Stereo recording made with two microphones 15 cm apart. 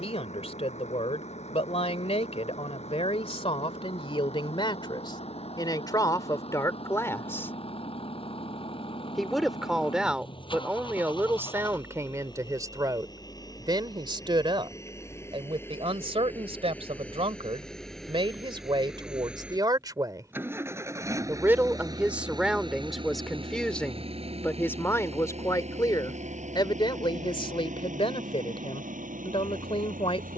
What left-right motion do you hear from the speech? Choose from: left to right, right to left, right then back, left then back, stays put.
right then back.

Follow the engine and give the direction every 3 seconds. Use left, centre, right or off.
left, left, left, left, left, centre, centre, right, right, right.